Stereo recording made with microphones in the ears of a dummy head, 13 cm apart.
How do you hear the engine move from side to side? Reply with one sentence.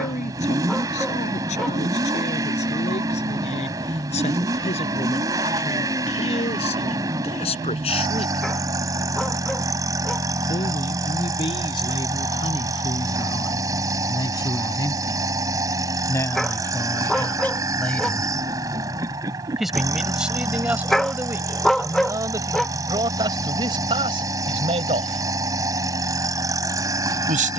In this clip you hear the engine stay in one place.